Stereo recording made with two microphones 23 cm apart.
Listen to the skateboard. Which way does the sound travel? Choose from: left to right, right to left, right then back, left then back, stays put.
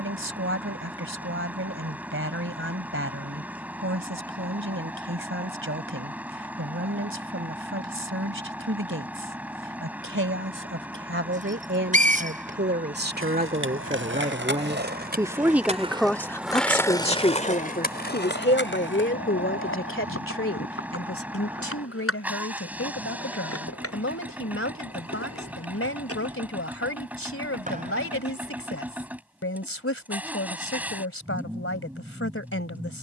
right to left.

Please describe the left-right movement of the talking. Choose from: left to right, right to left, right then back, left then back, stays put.
right to left.